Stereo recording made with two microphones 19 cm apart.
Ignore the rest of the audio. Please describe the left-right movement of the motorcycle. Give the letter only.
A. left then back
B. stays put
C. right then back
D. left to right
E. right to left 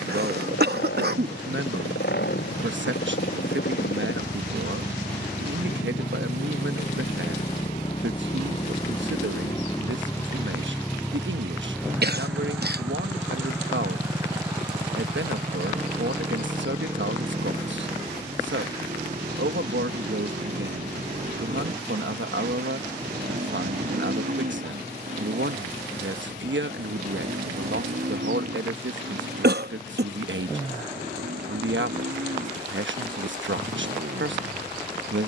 D.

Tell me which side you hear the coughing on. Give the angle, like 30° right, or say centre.
60° right.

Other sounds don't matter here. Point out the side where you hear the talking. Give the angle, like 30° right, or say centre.
80° right.